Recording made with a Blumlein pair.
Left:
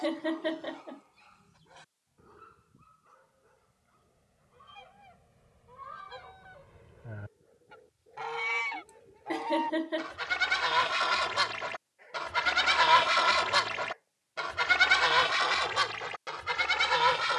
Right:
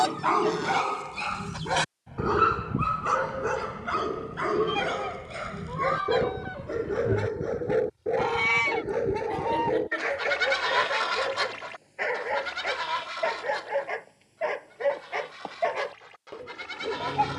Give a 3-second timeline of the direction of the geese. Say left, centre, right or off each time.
right, right, right, centre, left, left.